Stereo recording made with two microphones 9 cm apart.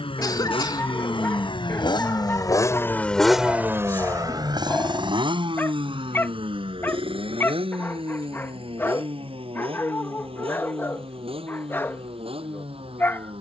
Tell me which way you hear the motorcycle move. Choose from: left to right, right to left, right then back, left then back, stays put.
left to right.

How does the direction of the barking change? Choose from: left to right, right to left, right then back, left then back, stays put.
stays put.